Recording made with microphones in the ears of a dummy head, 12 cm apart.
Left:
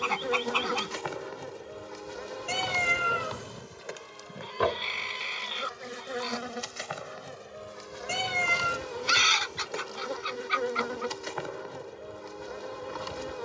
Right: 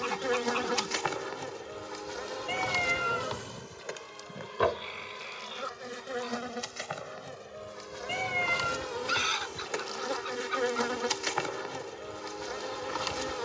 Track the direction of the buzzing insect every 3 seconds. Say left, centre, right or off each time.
right, centre, centre, right, right.